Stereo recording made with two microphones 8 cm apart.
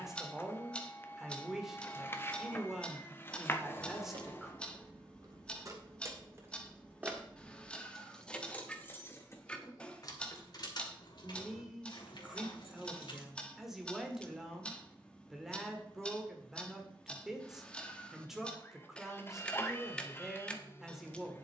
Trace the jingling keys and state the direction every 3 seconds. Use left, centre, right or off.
off, right, centre, left, left, off, off.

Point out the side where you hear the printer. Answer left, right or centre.
left.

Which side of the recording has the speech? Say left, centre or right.
centre.